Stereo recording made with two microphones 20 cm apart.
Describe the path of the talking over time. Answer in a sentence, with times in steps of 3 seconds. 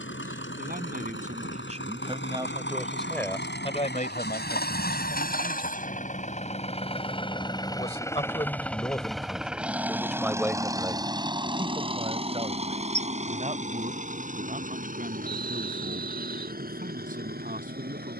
In this clip you hear the talking on the right from 0 s, on the left from 3 s, in the centre from 9 s and on the right from 12 s.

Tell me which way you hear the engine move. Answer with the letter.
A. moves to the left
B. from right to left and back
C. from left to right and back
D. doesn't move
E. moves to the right
E.